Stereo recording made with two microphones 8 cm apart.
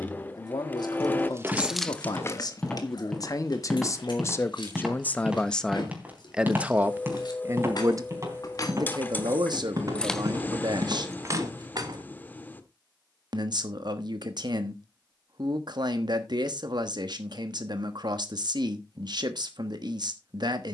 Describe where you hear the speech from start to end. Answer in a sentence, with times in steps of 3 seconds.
You can hear the speech on the left from 0 s and on the right from 6 s.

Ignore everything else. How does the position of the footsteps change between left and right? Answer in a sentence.
In this clip you hear the footsteps move to the right.